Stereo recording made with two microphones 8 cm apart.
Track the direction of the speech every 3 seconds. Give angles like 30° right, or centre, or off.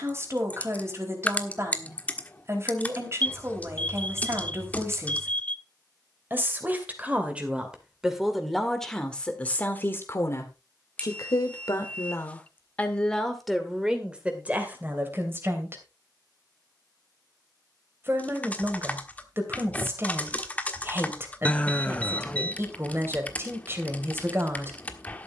30° right, 30° right, 10° right, 30° left, centre, 30° right, 30° right, 30° right, 30° right.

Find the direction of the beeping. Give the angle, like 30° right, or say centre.
20° left.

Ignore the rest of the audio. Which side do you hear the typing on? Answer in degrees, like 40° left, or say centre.
20° left.